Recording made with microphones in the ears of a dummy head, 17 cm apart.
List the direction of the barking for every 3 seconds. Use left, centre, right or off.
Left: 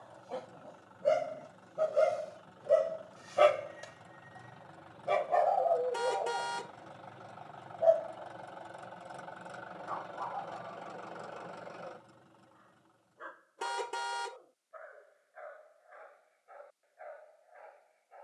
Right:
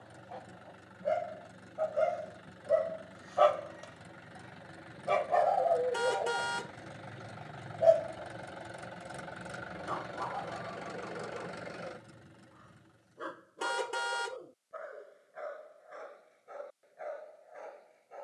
left, centre, right, right, right, right.